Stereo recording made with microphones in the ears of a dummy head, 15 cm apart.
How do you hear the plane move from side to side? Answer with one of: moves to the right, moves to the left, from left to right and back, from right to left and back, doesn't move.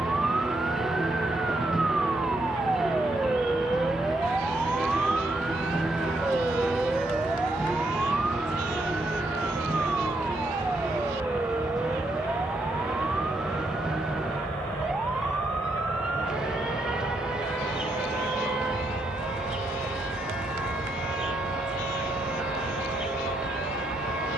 moves to the left.